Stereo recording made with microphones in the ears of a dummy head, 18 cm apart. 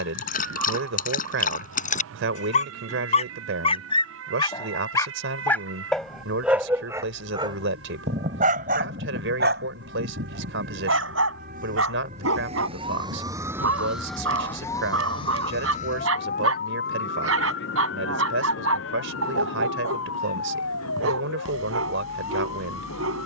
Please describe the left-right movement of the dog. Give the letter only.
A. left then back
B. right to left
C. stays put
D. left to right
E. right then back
D.